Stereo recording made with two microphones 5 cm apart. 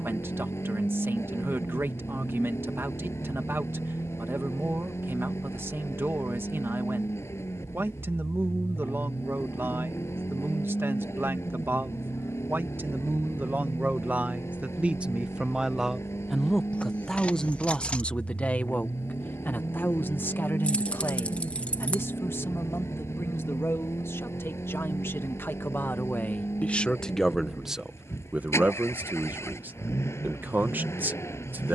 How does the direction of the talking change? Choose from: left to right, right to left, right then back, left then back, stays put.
left then back.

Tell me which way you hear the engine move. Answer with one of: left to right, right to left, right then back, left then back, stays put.
stays put.